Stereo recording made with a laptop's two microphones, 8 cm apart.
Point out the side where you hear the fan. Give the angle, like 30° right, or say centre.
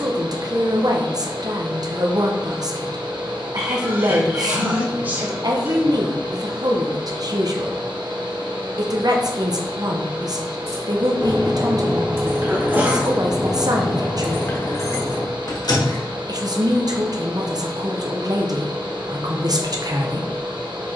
70° right.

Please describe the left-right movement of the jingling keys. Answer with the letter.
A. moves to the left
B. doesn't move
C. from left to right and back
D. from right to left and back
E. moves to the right
A.